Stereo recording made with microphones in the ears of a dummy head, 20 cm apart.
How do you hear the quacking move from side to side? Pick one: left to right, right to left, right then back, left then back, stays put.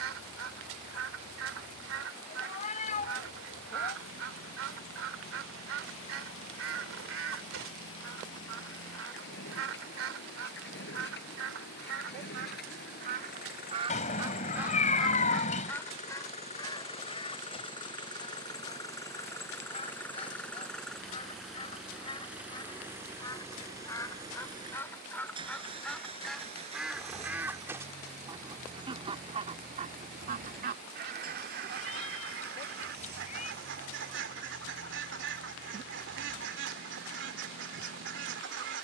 left then back.